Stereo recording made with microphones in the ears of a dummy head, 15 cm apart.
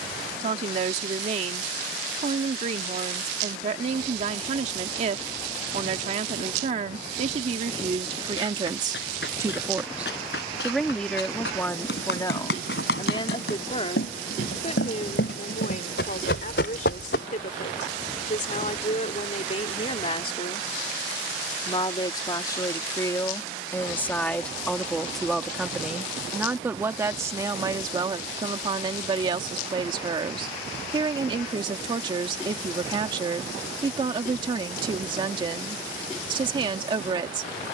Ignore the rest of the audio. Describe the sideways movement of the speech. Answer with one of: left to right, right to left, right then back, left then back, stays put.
left then back.